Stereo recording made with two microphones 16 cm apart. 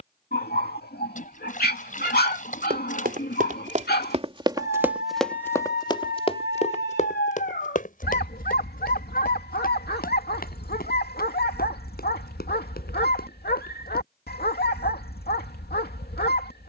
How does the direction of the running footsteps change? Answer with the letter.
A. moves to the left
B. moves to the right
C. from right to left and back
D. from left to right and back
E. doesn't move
A.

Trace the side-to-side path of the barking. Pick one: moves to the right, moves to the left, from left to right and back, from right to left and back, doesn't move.
doesn't move.